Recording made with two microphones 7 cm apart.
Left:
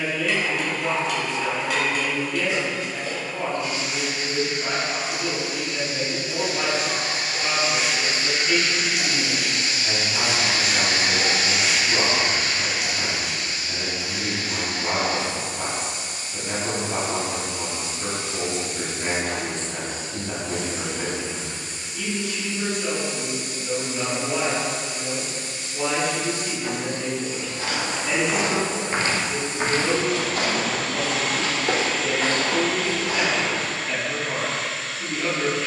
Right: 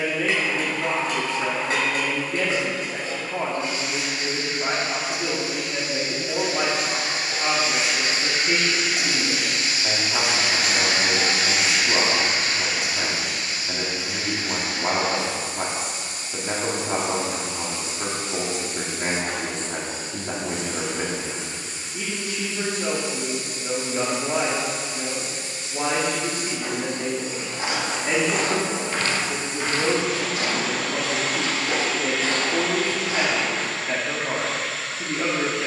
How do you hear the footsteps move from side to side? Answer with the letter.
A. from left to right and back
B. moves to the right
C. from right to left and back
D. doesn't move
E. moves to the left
E.